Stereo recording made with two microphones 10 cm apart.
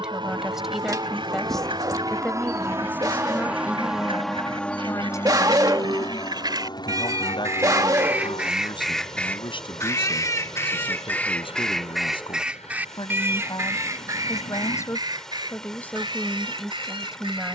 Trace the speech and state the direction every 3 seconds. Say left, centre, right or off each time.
centre, left, left, left, left, centre.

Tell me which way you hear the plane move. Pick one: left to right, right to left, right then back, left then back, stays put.
right to left.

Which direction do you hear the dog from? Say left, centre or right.
right.